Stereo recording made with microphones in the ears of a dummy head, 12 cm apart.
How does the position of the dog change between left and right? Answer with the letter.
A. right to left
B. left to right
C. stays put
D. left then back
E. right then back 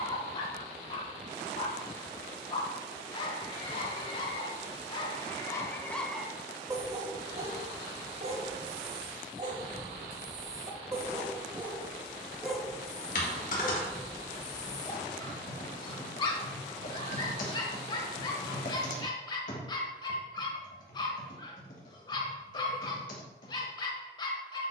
E.